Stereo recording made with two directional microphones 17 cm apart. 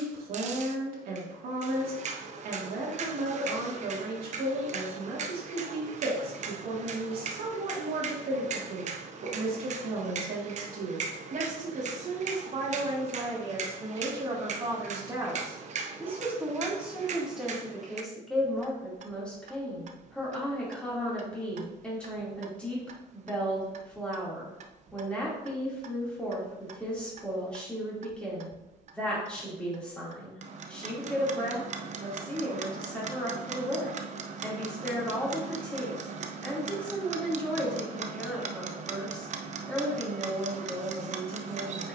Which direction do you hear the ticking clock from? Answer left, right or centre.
right.